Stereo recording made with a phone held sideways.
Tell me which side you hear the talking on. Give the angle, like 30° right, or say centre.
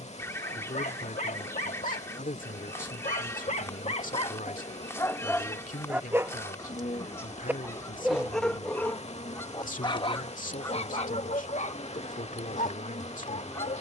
70° left.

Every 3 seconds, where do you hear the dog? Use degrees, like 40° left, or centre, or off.
70° left, 30° left, centre, 40° left, 60° left.